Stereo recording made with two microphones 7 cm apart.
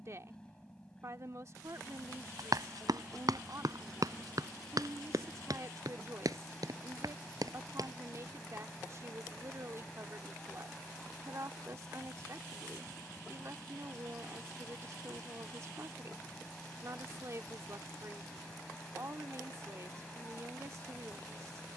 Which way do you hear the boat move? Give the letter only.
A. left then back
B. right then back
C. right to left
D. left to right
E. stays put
E.